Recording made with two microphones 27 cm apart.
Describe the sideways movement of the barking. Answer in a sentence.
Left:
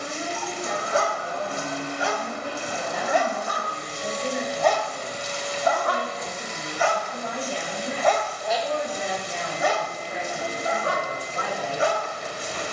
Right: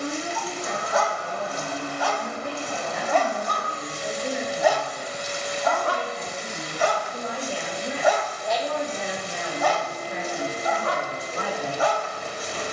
In this clip you hear the barking move from left to right and back again.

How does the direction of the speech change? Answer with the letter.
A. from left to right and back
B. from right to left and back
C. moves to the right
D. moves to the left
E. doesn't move
B.